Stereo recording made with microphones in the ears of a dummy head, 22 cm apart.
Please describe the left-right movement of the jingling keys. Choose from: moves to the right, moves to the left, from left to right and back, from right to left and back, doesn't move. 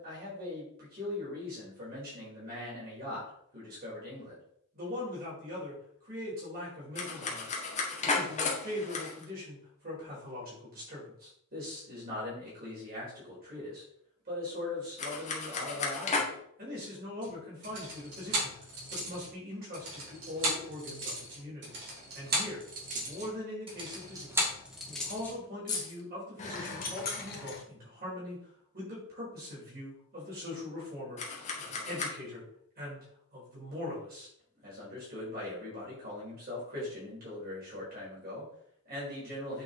moves to the left.